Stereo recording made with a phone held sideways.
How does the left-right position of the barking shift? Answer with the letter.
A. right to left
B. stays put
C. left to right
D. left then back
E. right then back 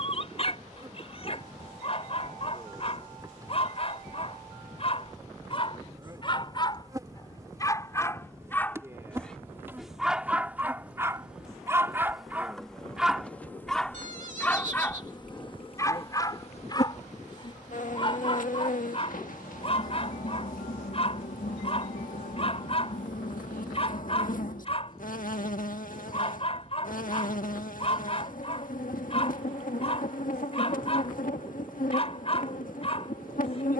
E.